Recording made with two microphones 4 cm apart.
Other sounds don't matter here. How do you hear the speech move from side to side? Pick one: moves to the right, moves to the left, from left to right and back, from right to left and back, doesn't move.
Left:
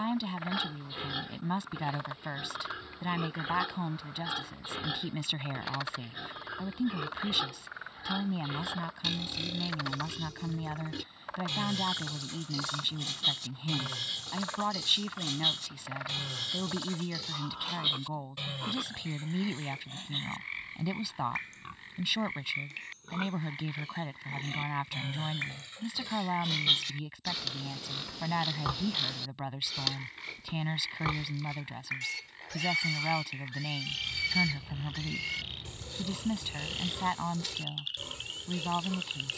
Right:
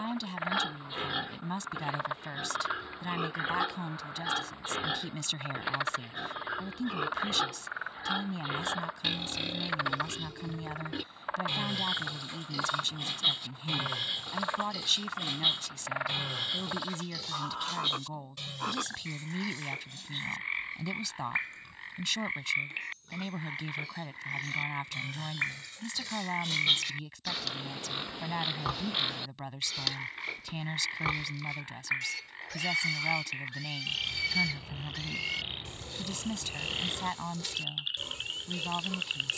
doesn't move.